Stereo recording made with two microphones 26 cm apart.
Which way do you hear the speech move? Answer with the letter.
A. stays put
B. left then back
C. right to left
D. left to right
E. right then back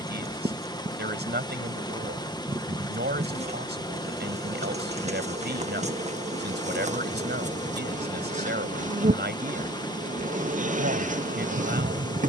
A.